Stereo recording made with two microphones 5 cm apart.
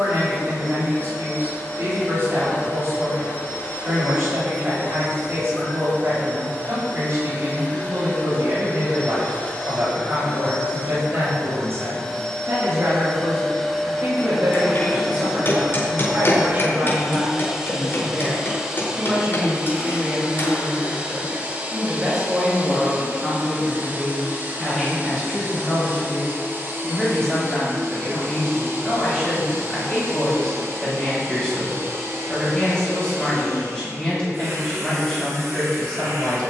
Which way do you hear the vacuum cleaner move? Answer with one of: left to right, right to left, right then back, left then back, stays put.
left to right.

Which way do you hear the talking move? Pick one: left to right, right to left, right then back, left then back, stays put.
right to left.